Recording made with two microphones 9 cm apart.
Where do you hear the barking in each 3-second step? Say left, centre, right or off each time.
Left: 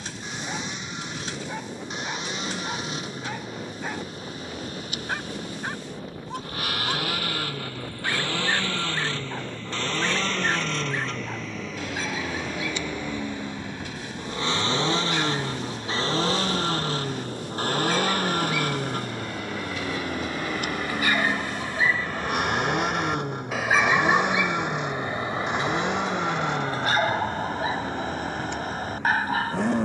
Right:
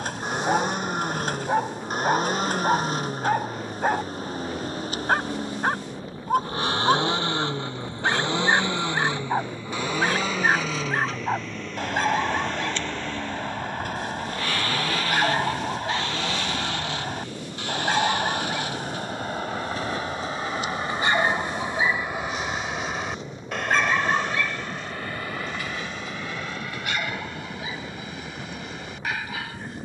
right, right, right, right, right, right, right, centre, left, left.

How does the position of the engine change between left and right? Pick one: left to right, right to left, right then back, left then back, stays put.
right to left.